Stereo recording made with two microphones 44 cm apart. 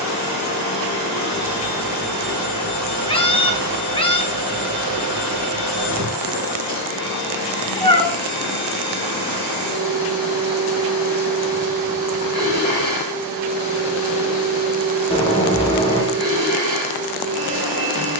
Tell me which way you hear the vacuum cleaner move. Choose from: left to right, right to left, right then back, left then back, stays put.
stays put.